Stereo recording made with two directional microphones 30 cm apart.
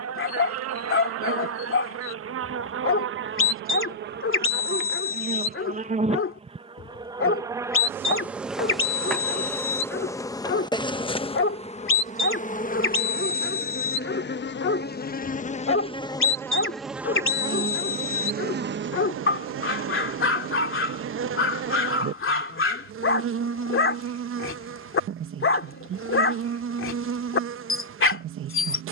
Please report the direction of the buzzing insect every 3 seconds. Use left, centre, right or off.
right, right, centre, centre, left, centre, right, right, right, right.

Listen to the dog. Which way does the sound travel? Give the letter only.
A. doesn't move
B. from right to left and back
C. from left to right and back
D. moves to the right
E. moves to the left
A.